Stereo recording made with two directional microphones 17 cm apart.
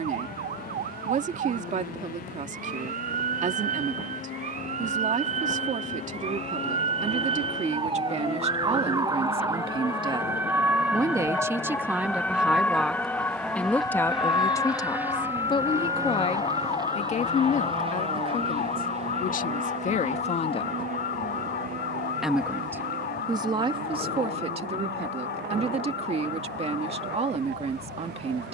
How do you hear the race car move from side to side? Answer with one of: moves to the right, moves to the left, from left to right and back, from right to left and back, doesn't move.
moves to the right.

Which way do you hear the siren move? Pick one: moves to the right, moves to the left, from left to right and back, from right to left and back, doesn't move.
moves to the left.